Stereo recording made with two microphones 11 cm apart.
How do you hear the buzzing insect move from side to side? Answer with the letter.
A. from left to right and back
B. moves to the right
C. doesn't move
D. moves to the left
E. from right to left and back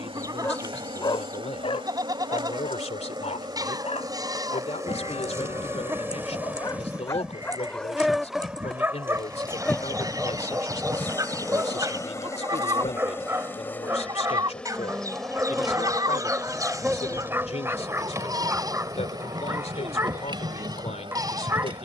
E.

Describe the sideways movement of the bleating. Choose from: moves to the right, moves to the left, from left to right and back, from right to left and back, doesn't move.
doesn't move.